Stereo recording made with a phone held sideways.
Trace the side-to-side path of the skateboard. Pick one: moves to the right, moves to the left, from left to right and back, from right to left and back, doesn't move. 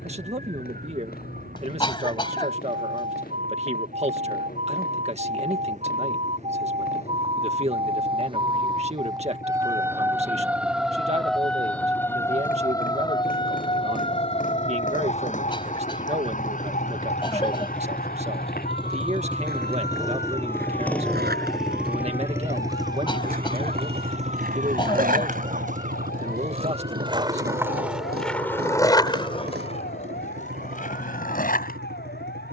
moves to the left.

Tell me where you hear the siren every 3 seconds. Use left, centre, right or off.
right, right, right, centre, left, left, left, left, left, left, left.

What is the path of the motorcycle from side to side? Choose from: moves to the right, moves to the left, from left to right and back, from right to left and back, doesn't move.
moves to the right.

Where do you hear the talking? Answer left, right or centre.
right.